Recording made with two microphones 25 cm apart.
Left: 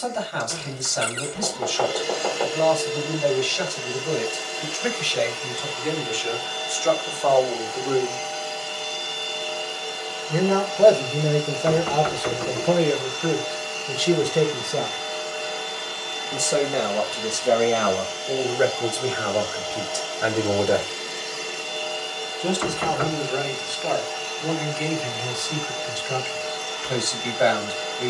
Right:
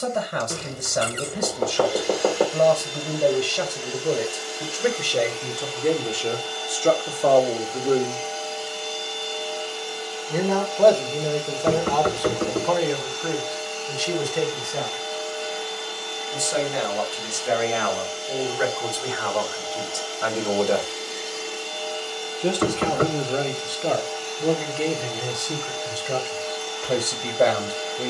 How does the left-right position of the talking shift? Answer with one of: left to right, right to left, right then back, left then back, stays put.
left then back.